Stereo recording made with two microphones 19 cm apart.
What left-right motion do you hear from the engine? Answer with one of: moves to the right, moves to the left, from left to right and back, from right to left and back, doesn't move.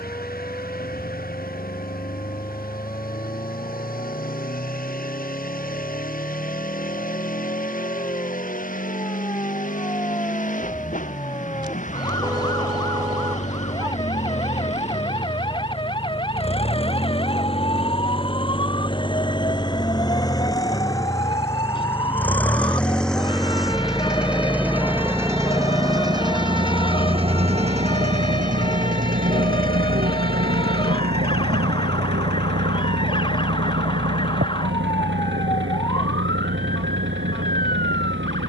moves to the right.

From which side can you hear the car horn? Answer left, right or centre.
right.